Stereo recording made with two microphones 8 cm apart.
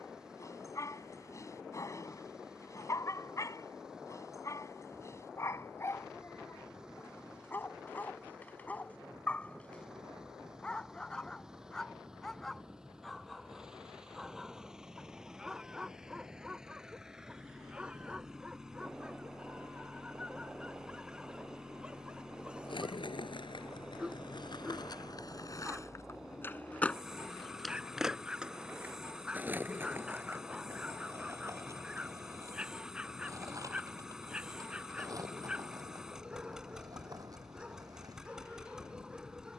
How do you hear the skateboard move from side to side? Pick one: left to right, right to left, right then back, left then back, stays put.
left to right.